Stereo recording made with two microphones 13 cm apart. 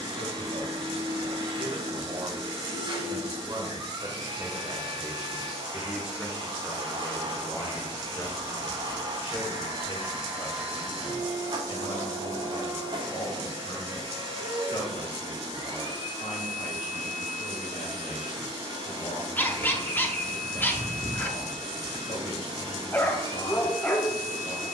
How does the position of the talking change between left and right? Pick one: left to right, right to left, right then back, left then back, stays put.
right to left.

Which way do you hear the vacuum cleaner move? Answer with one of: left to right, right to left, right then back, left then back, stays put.
stays put.